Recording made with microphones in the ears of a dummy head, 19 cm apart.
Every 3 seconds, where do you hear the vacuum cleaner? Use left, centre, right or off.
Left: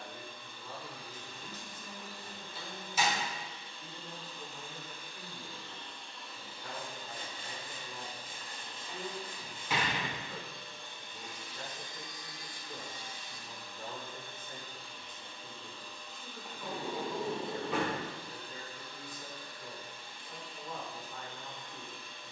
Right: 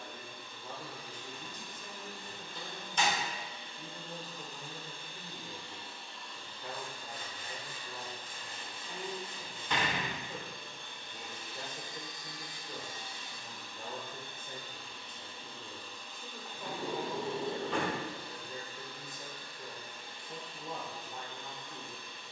right, right, centre, right, right, right, right, right.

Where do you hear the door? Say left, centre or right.
centre.